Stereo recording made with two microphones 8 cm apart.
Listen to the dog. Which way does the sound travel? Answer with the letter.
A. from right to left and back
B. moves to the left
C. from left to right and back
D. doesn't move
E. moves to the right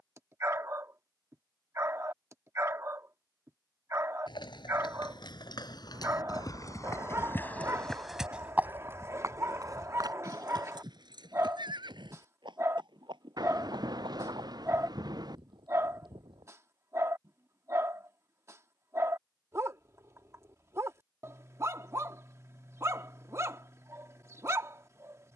D.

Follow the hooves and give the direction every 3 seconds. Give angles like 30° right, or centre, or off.
off, 70° left, 20° left, 50° right, 70° right, 80° right, off, off, off.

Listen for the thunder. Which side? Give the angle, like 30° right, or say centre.
60° right.